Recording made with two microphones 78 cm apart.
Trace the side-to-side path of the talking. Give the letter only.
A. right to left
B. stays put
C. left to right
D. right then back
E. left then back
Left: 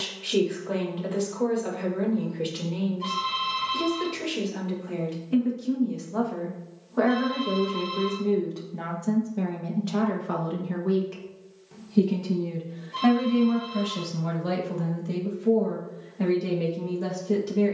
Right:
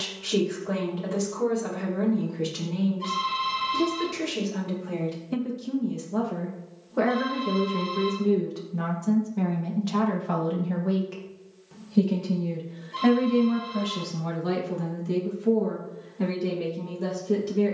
A.